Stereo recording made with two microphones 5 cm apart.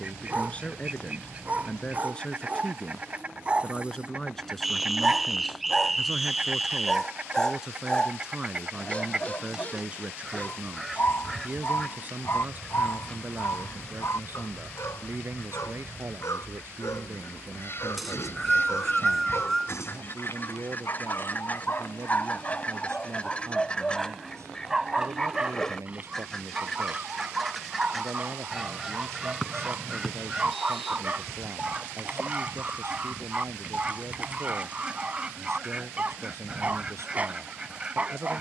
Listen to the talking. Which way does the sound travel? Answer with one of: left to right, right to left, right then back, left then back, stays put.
left to right.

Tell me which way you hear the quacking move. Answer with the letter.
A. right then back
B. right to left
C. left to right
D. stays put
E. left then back
E.